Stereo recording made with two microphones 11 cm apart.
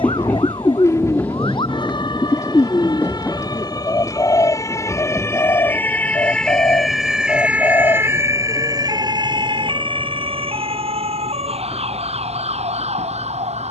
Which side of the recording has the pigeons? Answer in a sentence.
In this clip you hear the pigeons on the left.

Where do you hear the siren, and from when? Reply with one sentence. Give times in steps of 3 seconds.
In this clip you hear the siren on the left from 0 s, in the centre from 6 s and on the right from 9 s.